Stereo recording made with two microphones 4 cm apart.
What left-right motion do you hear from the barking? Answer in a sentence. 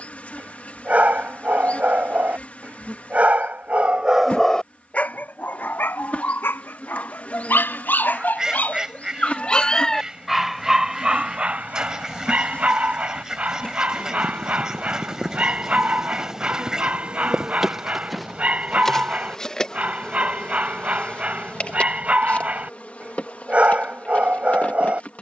You can hear the barking move from right to left and back again.